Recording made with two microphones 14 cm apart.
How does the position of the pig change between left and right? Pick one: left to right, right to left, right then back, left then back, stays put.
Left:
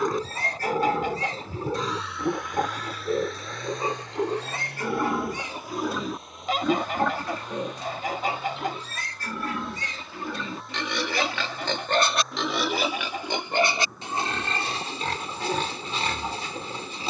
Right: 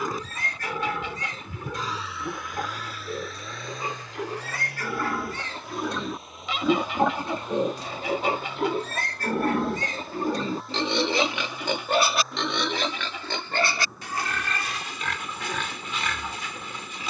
right then back.